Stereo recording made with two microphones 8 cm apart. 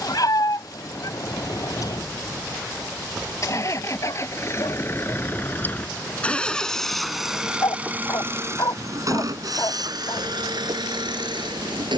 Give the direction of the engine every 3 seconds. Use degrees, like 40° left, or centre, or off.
50° left, 30° left, 10° right, 70° right.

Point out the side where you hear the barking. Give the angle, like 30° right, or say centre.
60° left.